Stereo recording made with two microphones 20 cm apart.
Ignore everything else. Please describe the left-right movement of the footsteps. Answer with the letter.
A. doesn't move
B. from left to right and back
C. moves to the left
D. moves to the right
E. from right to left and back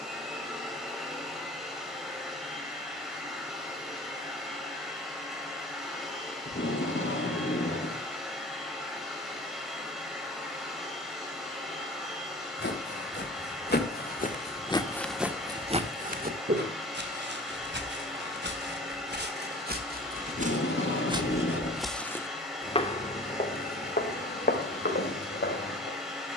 B.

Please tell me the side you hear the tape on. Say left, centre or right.
left.